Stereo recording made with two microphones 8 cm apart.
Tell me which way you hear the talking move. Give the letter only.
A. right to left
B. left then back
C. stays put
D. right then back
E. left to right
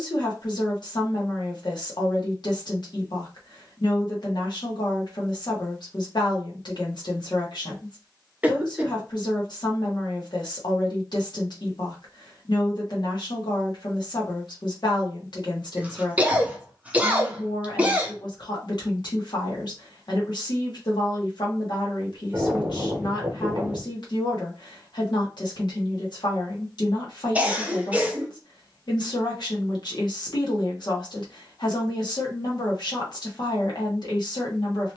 C.